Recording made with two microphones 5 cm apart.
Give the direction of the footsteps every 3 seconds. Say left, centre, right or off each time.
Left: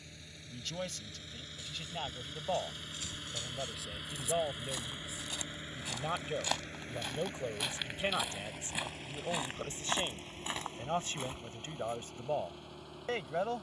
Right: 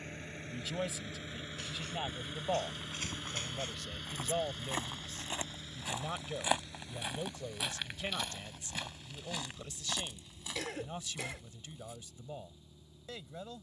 right, right, centre, left, off.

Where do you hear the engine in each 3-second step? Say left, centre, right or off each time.
right, centre, left, left, left.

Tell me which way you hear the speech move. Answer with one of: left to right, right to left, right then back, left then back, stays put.
right to left.